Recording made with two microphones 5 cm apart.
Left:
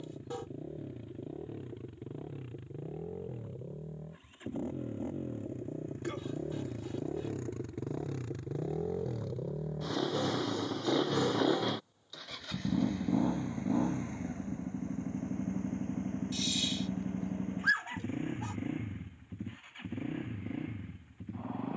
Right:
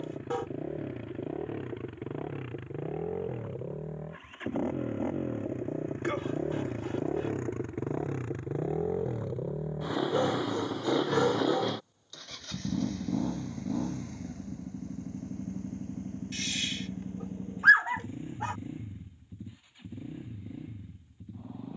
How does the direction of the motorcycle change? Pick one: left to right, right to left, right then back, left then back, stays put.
right to left.